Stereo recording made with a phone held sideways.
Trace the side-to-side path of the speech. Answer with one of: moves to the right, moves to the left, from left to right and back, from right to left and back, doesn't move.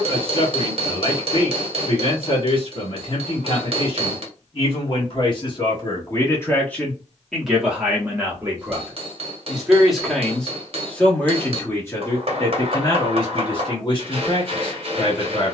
from left to right and back.